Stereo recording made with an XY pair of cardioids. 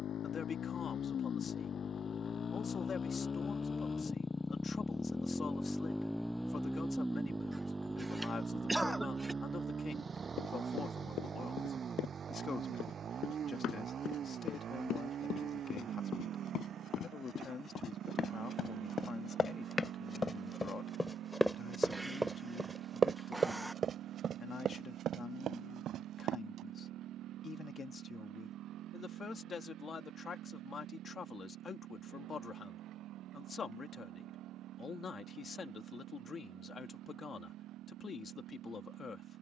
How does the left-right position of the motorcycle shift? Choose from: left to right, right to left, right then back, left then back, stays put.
left to right.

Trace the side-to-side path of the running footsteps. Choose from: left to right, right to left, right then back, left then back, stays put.
left to right.